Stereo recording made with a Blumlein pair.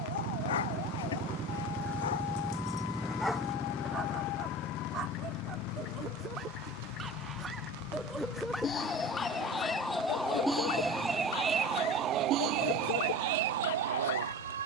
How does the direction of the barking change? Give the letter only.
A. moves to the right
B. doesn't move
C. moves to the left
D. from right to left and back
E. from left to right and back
E.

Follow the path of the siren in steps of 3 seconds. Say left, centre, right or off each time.
left, left, left, centre, right.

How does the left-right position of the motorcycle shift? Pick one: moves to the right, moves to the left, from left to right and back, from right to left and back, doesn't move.
moves to the left.